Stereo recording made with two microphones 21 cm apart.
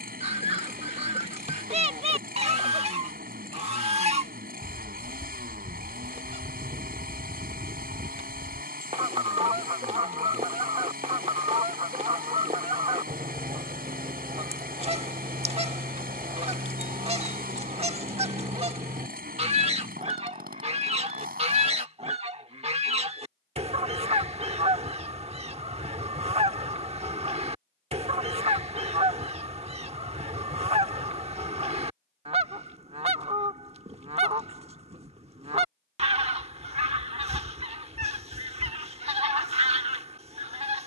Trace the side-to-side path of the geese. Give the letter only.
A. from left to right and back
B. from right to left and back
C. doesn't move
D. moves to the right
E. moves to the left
C.